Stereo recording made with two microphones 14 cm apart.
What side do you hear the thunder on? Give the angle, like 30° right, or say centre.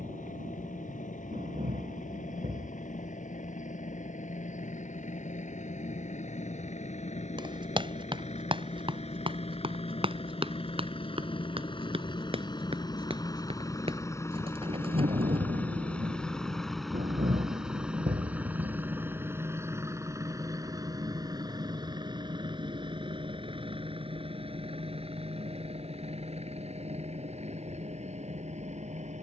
60° right.